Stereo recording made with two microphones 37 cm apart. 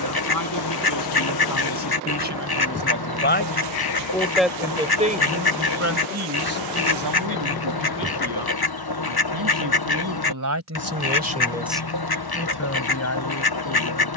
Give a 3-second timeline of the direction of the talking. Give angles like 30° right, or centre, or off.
50° left, 10° right, 60° right, 40° right, 40° left.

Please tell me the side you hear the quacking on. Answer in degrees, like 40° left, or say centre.
70° left.